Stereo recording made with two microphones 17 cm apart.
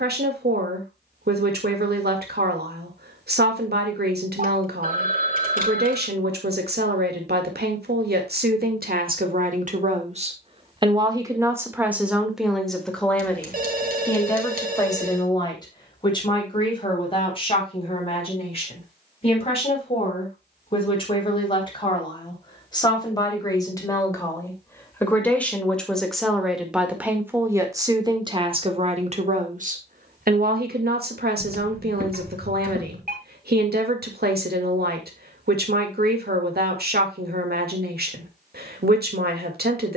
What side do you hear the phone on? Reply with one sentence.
In this clip you hear the phone on the right.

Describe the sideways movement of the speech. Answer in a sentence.
In this clip you hear the speech move from right to left and back again.